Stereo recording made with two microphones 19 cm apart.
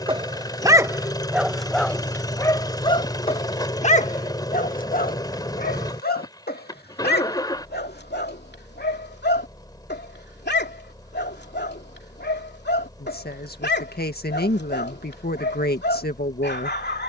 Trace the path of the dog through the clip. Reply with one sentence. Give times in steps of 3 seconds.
In this clip you hear the dog in the centre from 0 s and on the left from 3 s.